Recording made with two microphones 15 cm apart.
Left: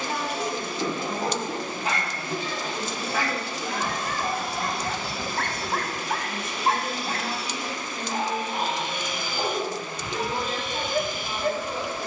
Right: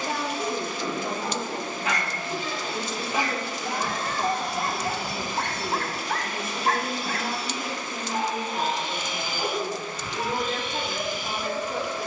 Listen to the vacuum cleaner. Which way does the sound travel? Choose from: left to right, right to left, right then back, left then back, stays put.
right then back.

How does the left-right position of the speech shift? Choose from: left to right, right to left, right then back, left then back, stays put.
stays put.